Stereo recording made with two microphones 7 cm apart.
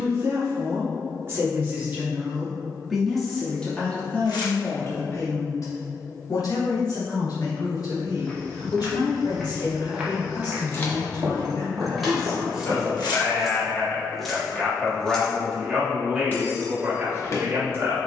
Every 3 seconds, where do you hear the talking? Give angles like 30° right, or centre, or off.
30° right, 30° left, 70° left, 60° left, 30° left, 20° right.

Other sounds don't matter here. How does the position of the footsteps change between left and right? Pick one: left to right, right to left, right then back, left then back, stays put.
left to right.